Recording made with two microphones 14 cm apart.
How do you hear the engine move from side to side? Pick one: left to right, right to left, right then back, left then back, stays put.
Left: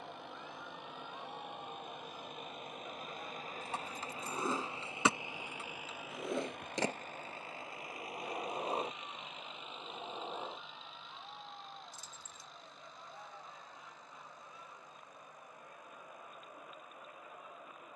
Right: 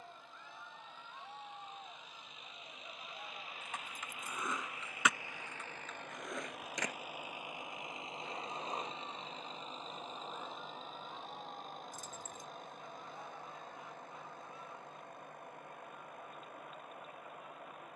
left to right.